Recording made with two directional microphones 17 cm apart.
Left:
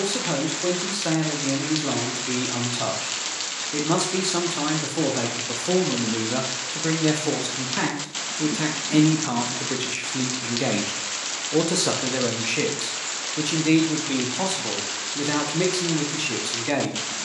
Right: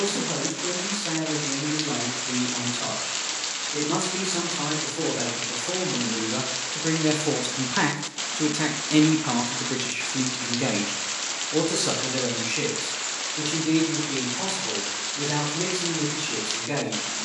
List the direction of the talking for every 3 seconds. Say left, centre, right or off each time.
left, left, centre, centre, left, left.